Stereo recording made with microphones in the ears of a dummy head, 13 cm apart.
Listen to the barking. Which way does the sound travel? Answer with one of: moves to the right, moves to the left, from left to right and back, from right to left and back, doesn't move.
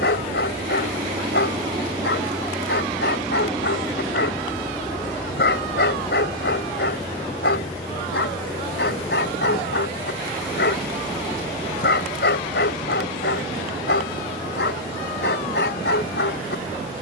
doesn't move.